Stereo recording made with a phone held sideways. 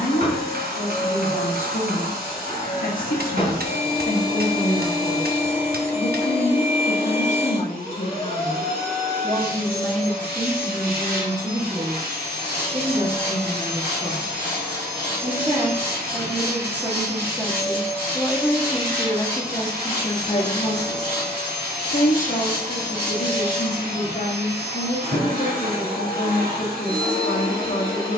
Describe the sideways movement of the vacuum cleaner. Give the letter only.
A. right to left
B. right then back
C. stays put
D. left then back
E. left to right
C.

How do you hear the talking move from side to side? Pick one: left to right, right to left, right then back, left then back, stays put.
right then back.